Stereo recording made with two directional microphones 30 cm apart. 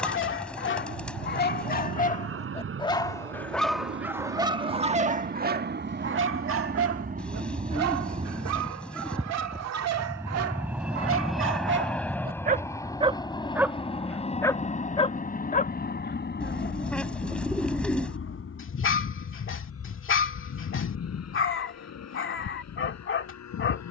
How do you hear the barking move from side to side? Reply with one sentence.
You can hear the barking move from left to right and back again.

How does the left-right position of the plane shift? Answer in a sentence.
In this clip you hear the plane move from right to left.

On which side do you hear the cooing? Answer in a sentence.
In this clip you hear the cooing in the centre.